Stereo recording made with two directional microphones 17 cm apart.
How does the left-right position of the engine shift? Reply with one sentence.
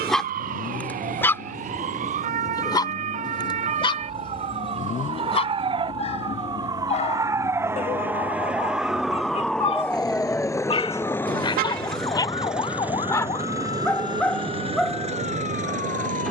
In this clip you hear the engine go from the left side to the right.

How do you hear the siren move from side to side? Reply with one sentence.
You can hear the siren go from the right side to the left.